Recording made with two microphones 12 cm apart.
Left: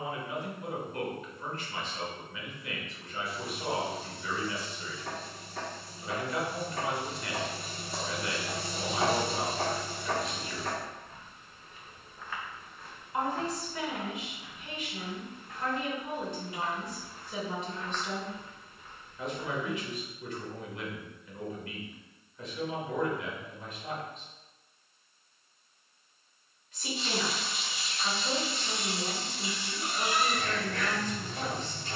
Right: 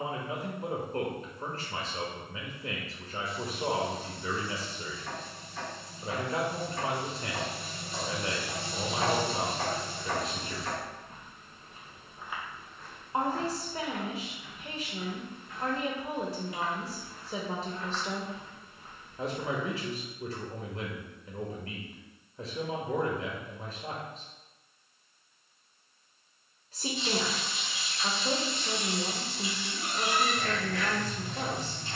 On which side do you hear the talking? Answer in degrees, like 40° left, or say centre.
30° right.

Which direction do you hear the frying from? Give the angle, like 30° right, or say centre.
60° left.